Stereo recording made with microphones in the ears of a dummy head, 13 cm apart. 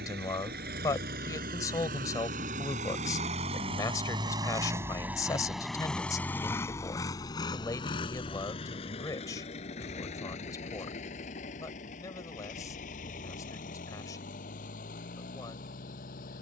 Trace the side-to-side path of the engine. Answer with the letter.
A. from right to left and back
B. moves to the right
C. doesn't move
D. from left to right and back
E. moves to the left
E.